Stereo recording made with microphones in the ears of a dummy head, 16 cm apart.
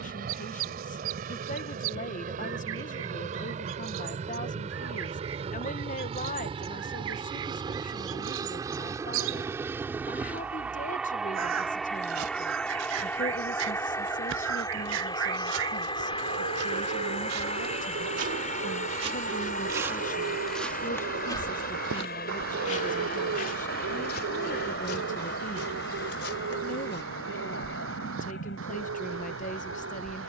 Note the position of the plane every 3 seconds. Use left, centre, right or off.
right, right, right, centre, centre, left, left, left, left, left.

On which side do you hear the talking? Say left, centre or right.
left.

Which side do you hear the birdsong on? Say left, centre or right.
right.